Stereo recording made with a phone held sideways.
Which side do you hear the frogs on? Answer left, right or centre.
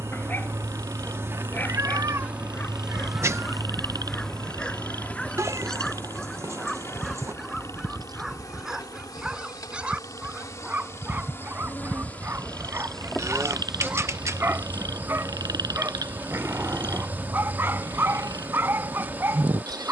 right.